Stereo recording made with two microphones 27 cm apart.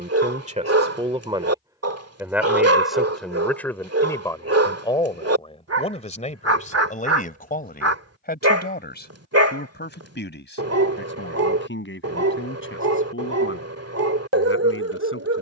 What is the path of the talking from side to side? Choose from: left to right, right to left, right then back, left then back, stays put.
right to left.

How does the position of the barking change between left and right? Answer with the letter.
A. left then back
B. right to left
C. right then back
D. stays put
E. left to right
D.